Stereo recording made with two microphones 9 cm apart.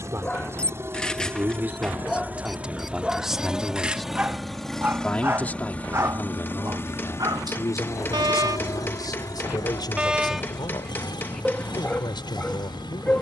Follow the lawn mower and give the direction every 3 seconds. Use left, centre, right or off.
right, centre, left, left, left.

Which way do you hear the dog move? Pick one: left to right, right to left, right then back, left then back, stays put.
right then back.